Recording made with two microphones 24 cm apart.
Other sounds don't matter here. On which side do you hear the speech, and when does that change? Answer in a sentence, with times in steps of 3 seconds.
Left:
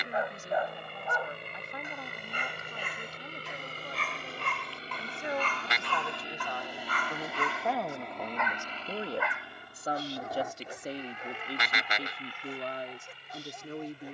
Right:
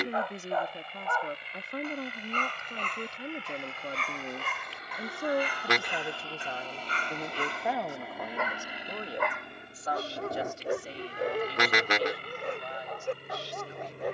You can hear the speech on the right from 0 s, in the centre from 6 s and on the left from 9 s.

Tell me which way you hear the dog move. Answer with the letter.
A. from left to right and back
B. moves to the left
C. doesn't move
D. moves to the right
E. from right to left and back
D.